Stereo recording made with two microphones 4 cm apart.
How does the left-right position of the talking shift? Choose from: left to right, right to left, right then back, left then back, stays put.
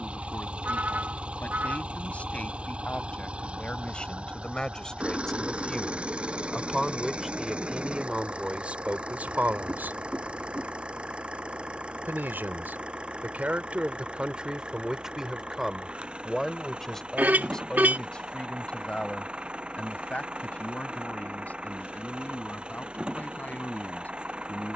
right then back.